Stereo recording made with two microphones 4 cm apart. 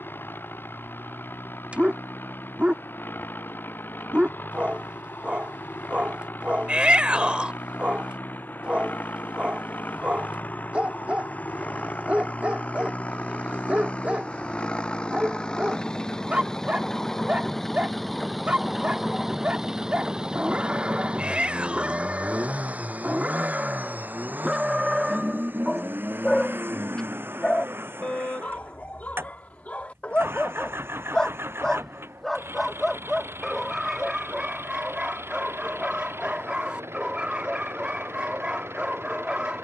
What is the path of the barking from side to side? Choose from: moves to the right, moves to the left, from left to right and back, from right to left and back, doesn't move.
from right to left and back.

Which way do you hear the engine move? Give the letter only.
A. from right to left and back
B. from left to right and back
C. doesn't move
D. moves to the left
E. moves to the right
E.